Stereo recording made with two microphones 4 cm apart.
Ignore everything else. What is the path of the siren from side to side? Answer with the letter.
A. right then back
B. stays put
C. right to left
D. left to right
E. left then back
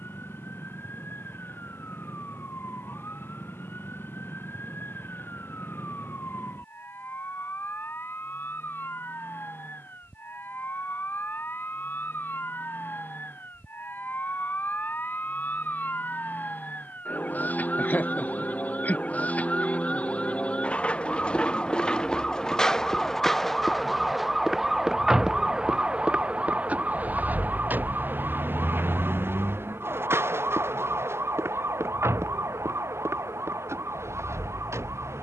D.